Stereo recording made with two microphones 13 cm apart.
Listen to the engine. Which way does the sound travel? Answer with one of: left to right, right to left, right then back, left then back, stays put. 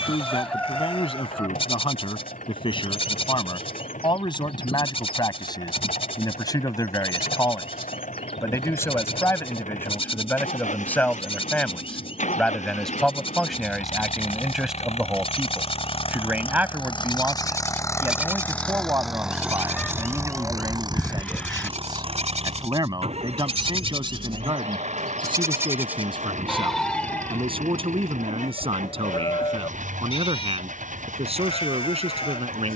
left to right.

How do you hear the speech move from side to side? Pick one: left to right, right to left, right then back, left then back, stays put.
left to right.